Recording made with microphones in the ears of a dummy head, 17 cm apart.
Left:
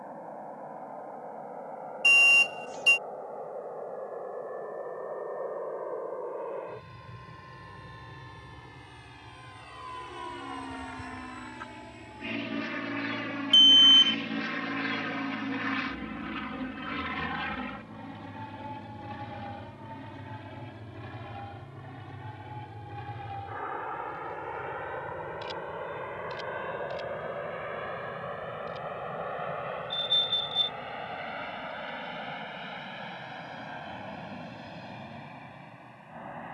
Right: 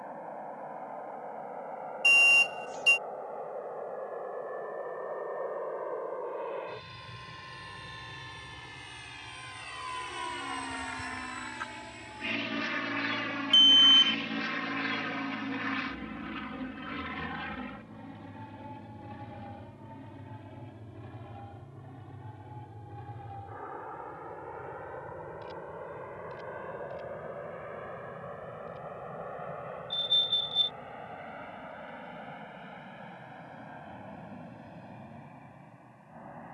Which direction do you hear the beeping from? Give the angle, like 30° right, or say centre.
centre.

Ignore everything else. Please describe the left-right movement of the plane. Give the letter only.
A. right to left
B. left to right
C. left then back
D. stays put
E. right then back
A.